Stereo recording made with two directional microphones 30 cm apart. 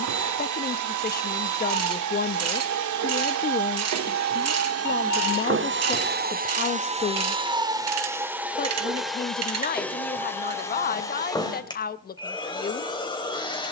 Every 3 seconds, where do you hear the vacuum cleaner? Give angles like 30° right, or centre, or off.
70° right, 50° right, 20° right, 10° left, 10° left.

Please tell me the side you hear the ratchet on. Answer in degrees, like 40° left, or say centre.
50° right.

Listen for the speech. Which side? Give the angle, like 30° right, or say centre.
30° left.